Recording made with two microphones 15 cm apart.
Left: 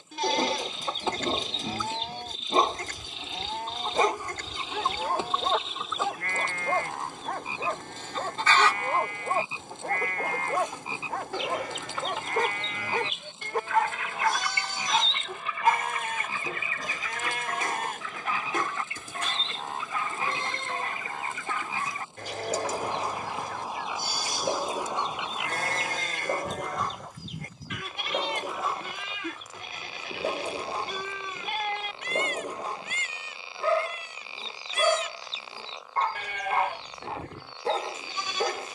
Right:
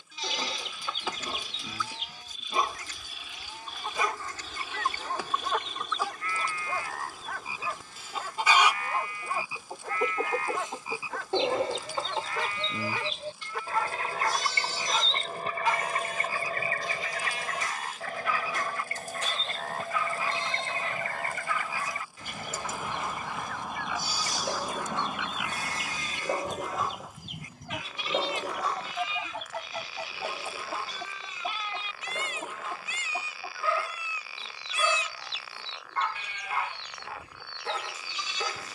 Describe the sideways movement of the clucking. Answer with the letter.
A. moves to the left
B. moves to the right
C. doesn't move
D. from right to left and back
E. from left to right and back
B.